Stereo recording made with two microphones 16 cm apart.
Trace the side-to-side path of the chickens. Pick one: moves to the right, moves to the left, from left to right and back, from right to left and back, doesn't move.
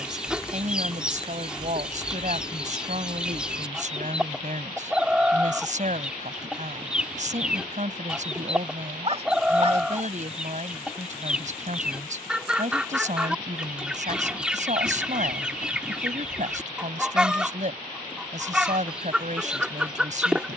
doesn't move.